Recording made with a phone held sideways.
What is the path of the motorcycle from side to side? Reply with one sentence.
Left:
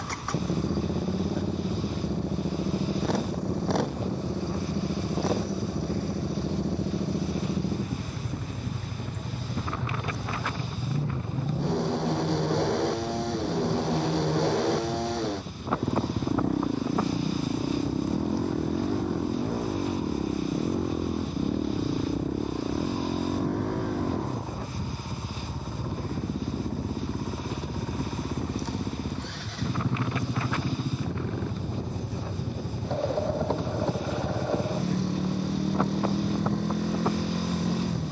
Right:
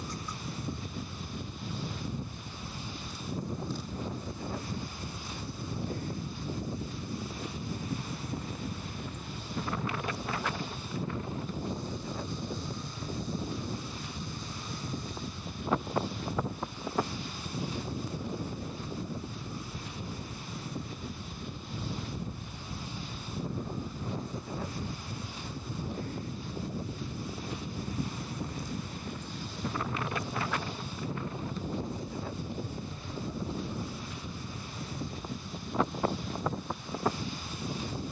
In this clip you hear the motorcycle stay in one place.